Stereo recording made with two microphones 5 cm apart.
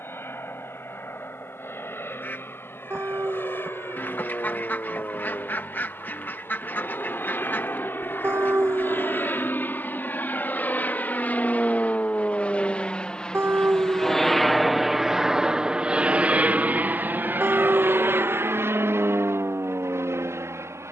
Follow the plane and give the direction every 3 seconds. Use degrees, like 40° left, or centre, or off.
60° left, 60° left, 60° left, 40° left, 20° left, 30° right, 60° right.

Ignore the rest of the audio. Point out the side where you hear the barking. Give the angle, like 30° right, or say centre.
60° right.